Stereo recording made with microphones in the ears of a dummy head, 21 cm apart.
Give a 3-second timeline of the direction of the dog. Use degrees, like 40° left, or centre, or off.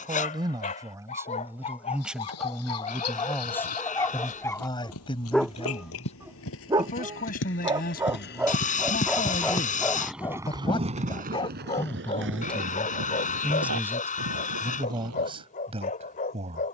30° left, 10° left, 10° right, 10° left, 30° left, 30° left.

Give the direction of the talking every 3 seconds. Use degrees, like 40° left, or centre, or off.
10° right, 20° left, 40° left, 20° left, centre, 20° right.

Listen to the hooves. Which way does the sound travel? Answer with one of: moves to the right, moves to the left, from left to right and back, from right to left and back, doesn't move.
moves to the right.